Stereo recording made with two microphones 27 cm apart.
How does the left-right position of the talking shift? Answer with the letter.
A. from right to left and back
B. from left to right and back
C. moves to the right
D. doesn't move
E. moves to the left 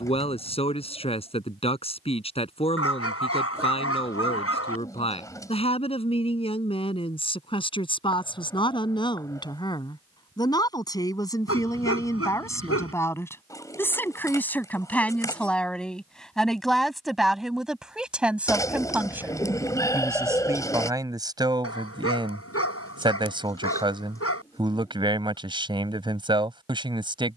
C.